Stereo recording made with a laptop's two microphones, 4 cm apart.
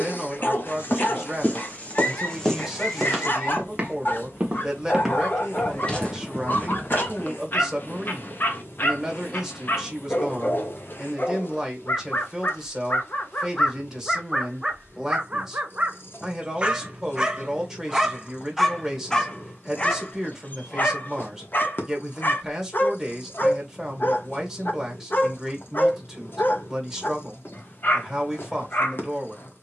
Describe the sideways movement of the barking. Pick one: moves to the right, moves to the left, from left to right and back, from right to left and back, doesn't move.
from left to right and back.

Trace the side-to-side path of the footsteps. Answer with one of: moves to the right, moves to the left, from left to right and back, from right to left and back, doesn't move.
from left to right and back.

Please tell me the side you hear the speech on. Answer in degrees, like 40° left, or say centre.
10° right.